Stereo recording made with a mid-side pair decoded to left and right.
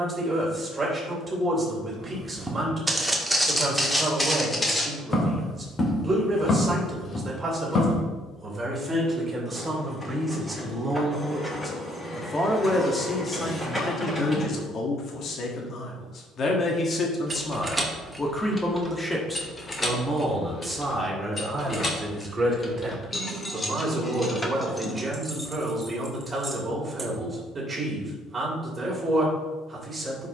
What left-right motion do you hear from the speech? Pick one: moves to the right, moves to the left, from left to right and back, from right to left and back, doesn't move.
from right to left and back.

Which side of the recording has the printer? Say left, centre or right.
centre.